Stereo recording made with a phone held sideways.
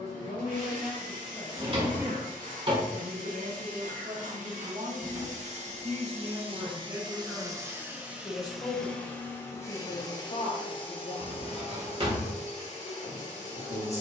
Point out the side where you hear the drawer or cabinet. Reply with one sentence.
You can hear the drawer or cabinet on the right.